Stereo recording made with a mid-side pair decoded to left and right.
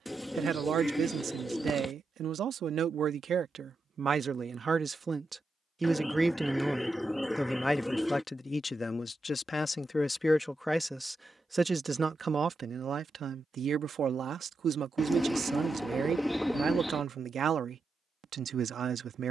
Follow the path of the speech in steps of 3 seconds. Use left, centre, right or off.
right, right, centre, centre, right, right, right.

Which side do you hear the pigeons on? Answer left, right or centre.
centre.